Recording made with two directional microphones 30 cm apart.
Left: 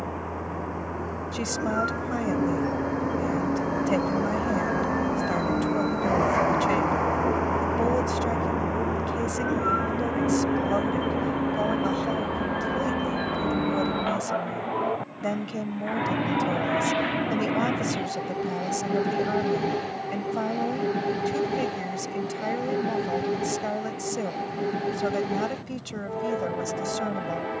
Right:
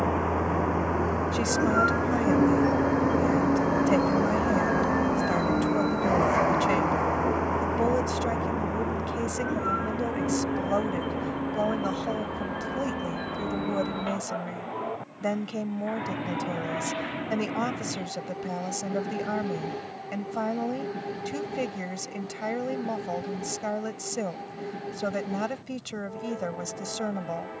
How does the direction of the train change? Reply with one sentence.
In this clip you hear the train move to the left.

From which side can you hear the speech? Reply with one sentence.
You can hear the speech in the centre.